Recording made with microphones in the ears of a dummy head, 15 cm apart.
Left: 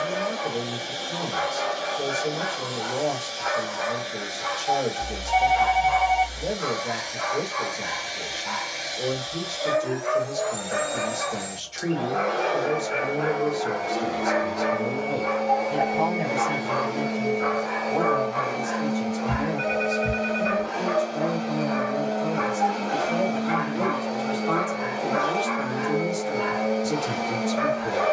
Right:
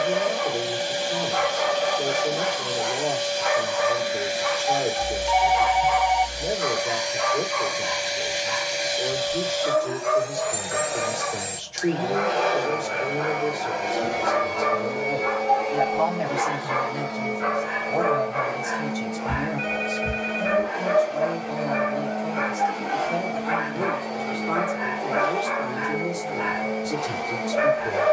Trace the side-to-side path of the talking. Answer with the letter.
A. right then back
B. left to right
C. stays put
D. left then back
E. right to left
A.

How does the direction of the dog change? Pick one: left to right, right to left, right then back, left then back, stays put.
left then back.